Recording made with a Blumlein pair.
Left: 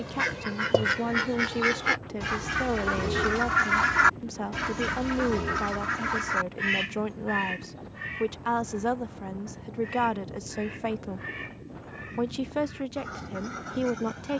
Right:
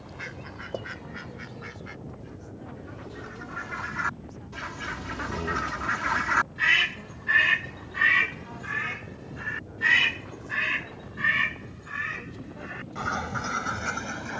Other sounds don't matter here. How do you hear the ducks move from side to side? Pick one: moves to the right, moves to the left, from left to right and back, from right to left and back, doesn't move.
moves to the right.